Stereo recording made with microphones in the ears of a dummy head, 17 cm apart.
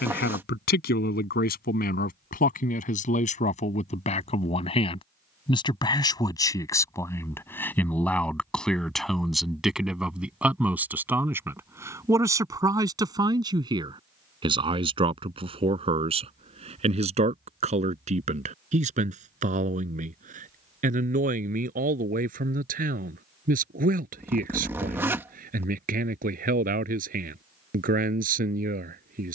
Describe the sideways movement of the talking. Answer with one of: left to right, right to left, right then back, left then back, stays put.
left to right.